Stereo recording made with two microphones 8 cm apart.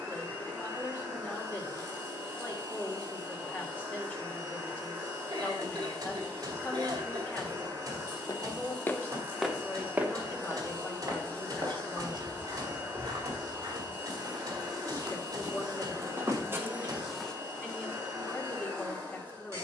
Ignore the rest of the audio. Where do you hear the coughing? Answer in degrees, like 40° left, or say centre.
60° right.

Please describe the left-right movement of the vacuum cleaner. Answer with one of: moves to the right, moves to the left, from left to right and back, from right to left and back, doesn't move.
doesn't move.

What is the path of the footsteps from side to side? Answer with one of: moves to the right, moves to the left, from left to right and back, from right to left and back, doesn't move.
from left to right and back.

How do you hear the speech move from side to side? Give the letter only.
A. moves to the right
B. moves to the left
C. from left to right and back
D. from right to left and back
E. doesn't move
E.